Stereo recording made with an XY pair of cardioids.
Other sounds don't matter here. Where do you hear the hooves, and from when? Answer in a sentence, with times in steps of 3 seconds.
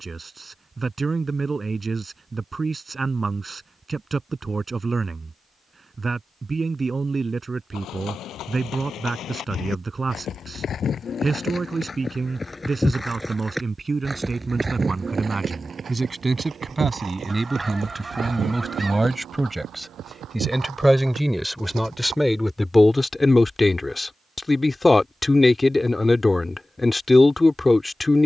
In this clip you hear the hooves not at all from 0 s, on the left from 6 s, in the centre from 12 s, on the right from 15 s and not at all from 24 s.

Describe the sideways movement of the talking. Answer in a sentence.
In this clip you hear the talking go from the right side to the left.